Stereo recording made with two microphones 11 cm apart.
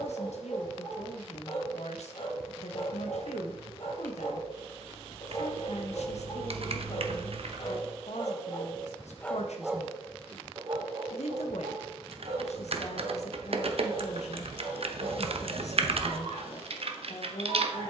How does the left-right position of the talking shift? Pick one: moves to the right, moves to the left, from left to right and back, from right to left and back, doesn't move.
doesn't move.